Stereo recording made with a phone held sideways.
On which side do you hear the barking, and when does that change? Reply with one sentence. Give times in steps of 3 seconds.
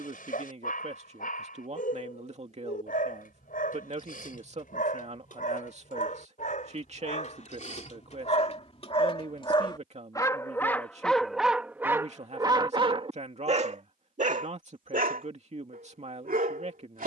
You can hear the barking on the left from 0 s, in the centre from 9 s and on the right from 12 s.